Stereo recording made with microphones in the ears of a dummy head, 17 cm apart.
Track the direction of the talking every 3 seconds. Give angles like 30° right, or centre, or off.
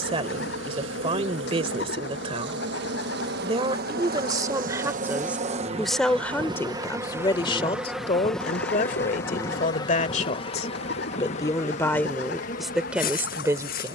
30° right, 20° right, 20° left, 30° left, 10° right.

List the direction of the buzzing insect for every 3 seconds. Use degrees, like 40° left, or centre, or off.
60° right, 40° right, 10° right, 30° left, 40° left.